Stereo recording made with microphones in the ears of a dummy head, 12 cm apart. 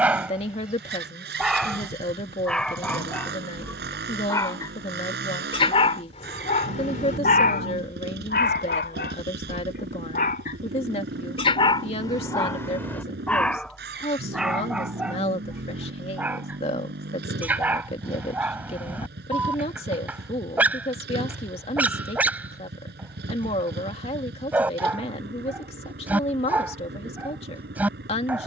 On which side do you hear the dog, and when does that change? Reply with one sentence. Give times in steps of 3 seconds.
You can hear the dog in the centre from 0 s, on the left from 3 s and in the centre from 12 s.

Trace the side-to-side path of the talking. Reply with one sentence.
You can hear the talking stay put.